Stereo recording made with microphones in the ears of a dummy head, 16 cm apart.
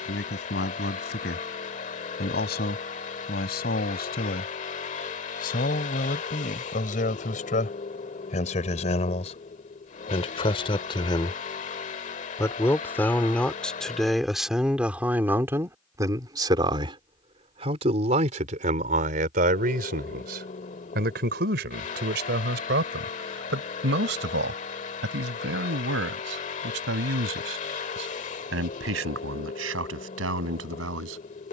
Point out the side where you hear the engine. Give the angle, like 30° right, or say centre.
40° left.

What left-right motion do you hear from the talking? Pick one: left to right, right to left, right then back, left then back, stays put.
left to right.